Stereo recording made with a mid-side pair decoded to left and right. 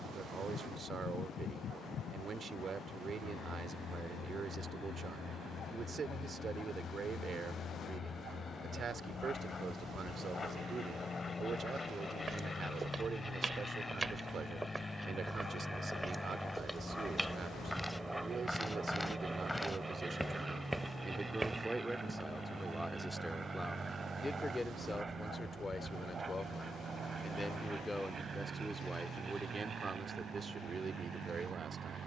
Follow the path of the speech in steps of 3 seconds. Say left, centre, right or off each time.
right, right, right, right, right, right, right, centre, left, centre, right.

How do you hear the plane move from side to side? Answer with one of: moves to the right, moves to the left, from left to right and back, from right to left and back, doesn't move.
moves to the right.